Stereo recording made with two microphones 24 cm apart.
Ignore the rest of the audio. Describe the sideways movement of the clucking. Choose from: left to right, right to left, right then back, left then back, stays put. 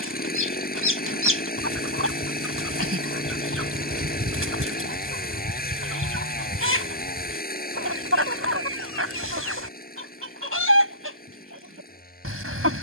stays put.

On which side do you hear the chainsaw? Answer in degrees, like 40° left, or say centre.
40° left.